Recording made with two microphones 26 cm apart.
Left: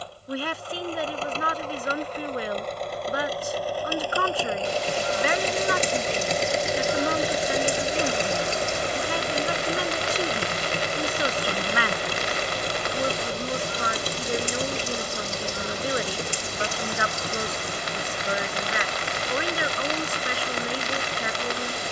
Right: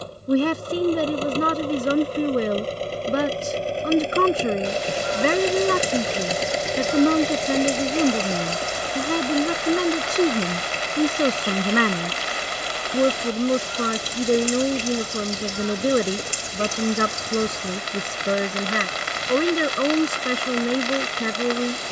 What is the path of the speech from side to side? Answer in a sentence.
In this clip you hear the speech stay in one place.